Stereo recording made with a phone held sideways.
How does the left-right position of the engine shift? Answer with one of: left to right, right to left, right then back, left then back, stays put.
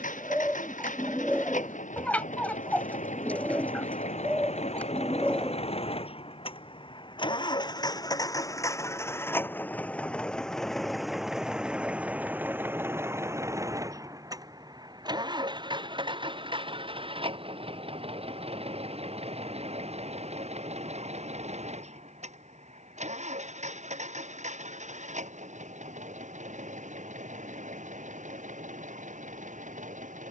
left to right.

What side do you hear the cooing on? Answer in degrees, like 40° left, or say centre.
10° left.